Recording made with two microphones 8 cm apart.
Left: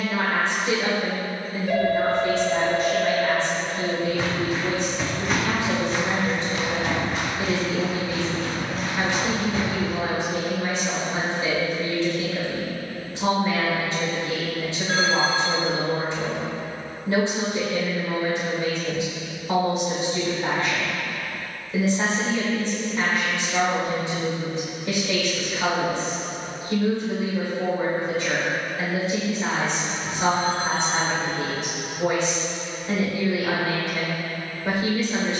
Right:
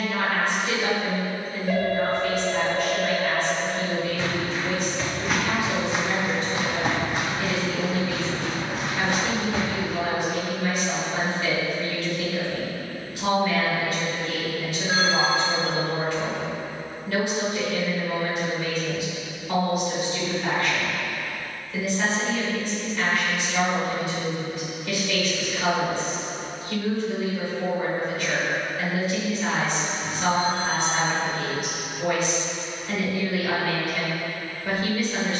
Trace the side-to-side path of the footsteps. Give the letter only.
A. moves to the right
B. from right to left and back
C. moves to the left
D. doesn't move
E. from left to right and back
A.